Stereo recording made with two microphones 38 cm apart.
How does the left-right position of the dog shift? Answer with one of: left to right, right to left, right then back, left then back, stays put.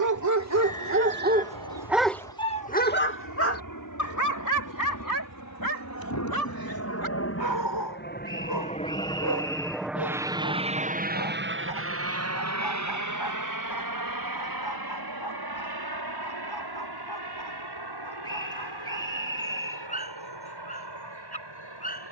right to left.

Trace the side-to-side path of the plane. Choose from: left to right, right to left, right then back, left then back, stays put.
left to right.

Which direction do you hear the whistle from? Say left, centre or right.
centre.